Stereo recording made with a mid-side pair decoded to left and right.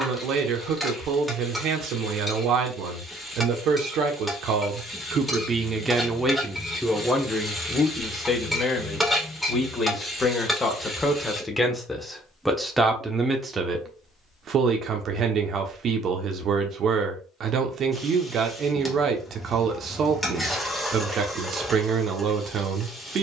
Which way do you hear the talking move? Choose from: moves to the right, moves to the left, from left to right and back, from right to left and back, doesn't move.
from right to left and back.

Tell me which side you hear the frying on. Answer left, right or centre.
centre.